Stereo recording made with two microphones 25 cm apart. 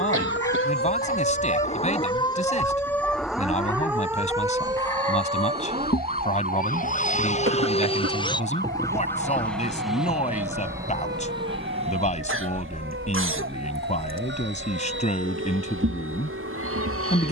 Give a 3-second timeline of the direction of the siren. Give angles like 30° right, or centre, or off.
30° left, 10° right, 30° right, 40° right, 50° right, 50° right.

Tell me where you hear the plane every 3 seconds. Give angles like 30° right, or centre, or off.
60° left, 50° left, 30° left, 10° right, 40° right, 50° right.